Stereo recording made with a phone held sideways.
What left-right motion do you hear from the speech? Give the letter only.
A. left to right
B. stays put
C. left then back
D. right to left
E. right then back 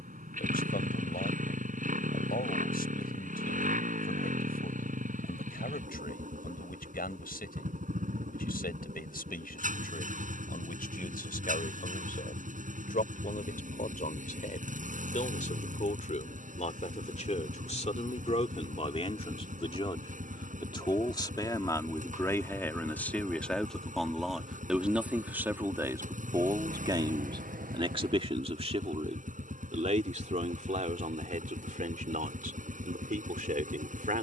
A.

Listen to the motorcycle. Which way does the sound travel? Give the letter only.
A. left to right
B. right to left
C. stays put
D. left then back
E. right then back
C.